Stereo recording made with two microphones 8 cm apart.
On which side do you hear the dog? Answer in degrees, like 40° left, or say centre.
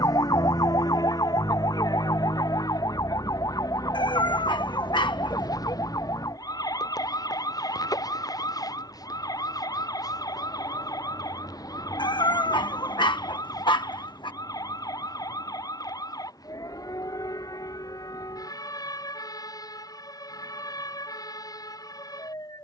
80° left.